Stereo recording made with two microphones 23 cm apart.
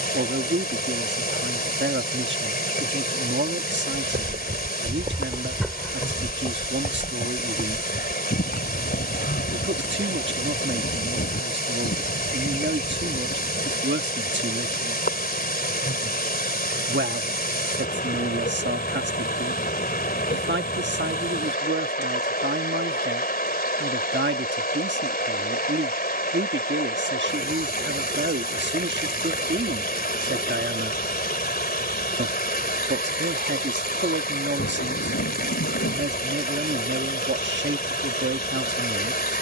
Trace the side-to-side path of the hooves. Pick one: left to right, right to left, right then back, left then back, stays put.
right to left.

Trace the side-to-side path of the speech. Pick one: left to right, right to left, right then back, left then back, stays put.
stays put.